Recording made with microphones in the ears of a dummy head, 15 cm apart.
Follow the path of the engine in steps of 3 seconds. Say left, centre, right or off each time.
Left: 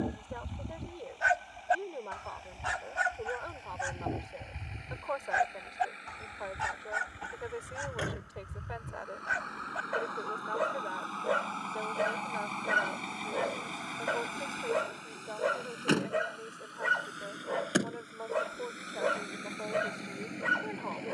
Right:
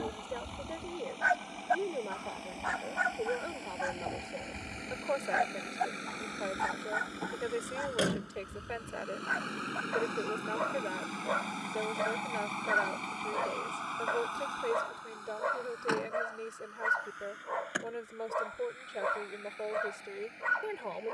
right, right, right, right, centre, left, left.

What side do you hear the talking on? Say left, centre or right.
right.